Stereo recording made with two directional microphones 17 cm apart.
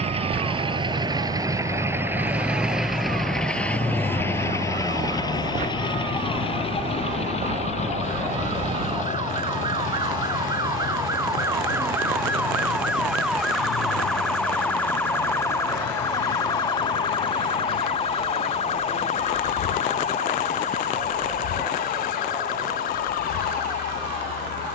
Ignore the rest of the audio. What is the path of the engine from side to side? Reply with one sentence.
In this clip you hear the engine move from right to left.